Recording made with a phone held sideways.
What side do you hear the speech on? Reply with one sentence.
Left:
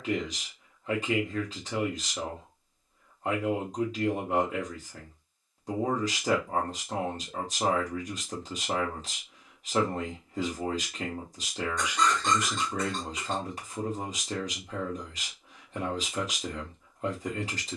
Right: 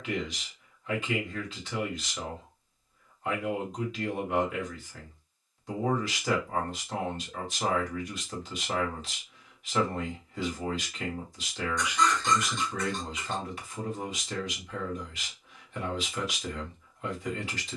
In this clip you hear the speech on the left.